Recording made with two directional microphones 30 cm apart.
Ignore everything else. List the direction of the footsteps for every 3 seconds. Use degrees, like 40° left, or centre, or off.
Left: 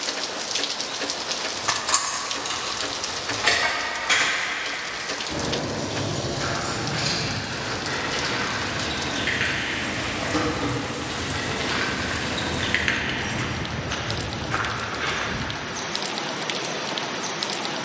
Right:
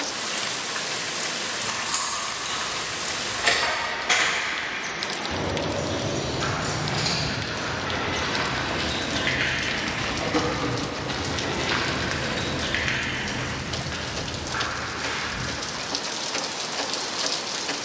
off, off, 60° right, 40° right, 20° left, 60° left.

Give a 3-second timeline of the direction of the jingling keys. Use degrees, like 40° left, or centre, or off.
30° left, centre, 10° right, centre, 20° left, off.